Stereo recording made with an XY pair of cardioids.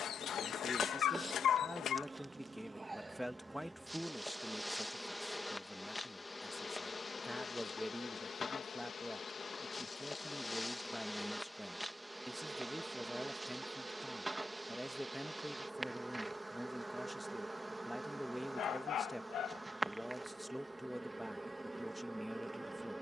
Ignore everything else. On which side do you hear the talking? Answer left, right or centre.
centre.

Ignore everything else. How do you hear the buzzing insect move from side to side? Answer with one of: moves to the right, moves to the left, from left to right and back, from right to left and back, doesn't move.
from right to left and back.